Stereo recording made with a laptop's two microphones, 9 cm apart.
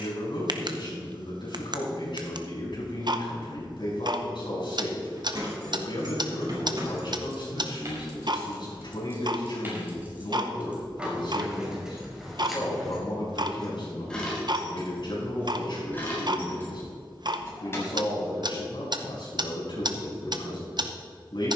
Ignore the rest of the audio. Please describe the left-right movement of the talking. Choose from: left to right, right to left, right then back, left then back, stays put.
stays put.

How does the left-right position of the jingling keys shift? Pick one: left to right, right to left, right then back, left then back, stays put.
right to left.